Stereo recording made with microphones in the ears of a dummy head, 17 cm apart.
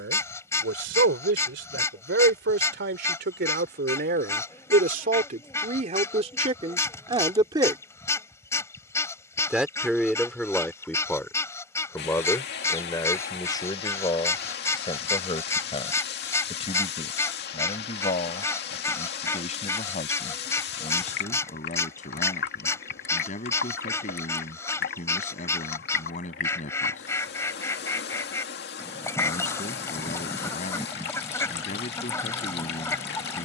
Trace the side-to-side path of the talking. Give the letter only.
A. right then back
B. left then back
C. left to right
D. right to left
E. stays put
D.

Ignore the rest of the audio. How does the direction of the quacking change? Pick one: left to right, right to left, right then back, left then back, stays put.
stays put.